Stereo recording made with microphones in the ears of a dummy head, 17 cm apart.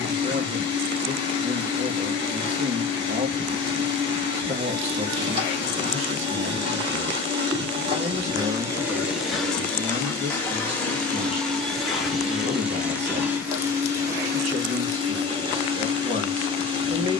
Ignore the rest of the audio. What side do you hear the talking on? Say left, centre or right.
right.